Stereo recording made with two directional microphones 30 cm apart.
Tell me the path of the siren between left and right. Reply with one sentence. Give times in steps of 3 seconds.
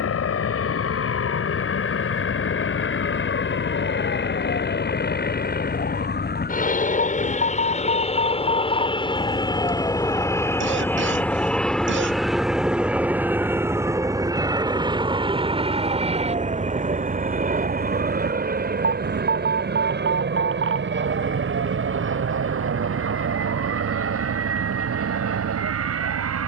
In this clip you hear the siren on the left from 0 s, in the centre from 9 s and on the right from 15 s.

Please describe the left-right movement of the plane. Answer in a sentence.
You can hear the plane go from the left side to the right.